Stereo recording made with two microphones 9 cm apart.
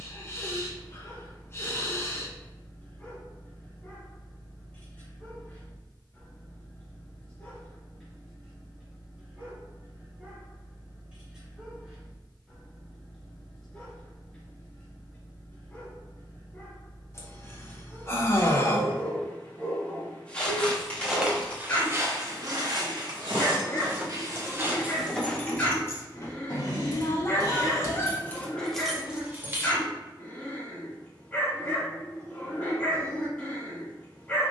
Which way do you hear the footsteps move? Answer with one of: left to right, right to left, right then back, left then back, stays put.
right then back.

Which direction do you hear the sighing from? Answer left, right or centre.
left.